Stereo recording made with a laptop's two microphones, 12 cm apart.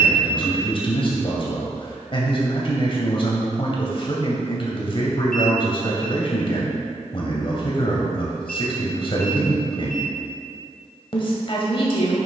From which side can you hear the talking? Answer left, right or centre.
left.